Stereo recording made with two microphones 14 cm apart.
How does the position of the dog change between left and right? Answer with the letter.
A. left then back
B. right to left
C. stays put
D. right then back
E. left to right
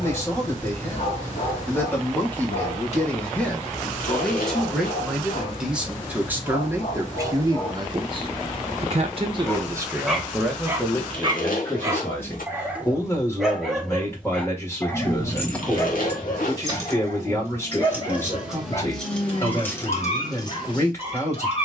D.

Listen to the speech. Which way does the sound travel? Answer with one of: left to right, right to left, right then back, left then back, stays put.
right then back.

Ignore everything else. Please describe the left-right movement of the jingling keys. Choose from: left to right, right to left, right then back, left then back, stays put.
right then back.